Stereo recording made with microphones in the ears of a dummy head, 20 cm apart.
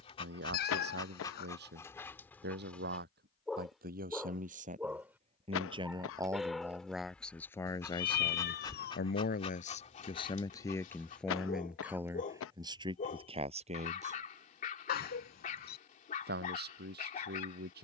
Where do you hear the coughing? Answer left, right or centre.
left.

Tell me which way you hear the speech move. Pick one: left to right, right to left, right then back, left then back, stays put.
left then back.